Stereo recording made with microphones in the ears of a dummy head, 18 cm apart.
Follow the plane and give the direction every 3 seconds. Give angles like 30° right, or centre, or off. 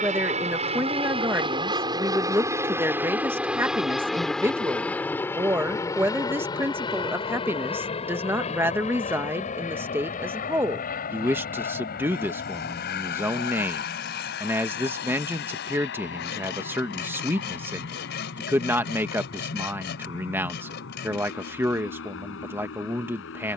20° right, centre, 20° left, 40° left, 50° left, 50° left, 60° left, 60° left.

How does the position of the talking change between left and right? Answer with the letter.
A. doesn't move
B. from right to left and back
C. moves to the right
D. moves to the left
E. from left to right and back
A.